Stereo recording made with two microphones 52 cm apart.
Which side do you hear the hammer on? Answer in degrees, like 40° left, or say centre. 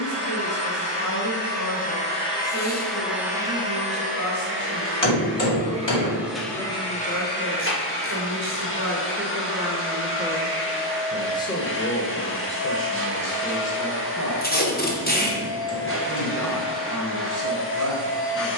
50° left.